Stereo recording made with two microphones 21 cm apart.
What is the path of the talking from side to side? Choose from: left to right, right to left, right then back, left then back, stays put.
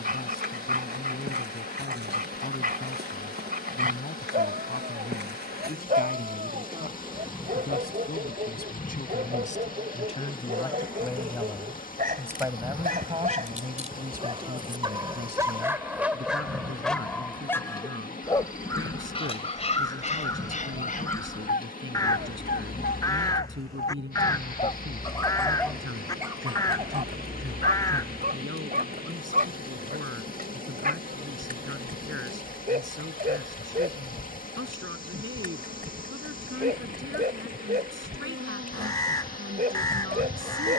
left to right.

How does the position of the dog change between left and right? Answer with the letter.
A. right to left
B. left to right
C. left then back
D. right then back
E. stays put
C.